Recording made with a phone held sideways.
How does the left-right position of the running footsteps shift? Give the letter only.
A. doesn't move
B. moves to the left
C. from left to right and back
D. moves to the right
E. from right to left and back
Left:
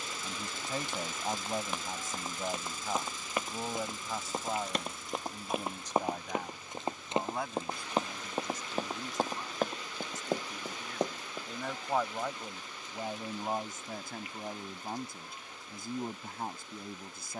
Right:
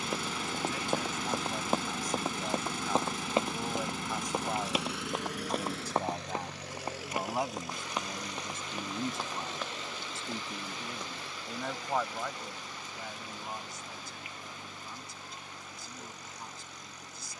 B.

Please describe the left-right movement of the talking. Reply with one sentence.
In this clip you hear the talking move from left to right and back again.